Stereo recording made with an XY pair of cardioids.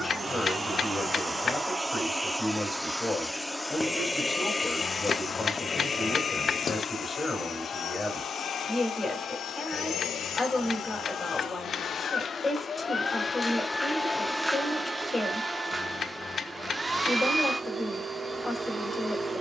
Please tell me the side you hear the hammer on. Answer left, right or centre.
left.